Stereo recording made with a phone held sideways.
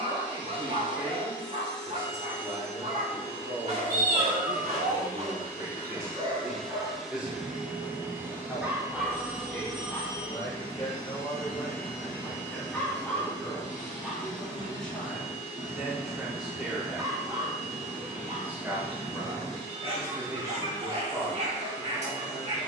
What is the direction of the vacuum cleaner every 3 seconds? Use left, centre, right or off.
left, left, centre, right, right, right, right, right.